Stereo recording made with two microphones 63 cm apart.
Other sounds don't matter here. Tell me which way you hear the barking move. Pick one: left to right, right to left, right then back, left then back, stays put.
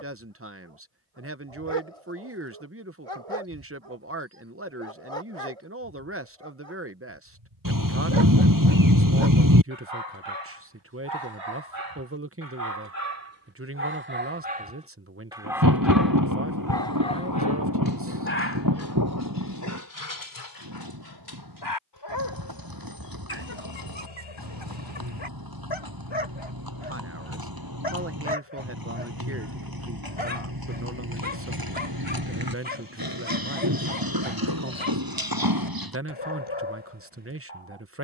right to left.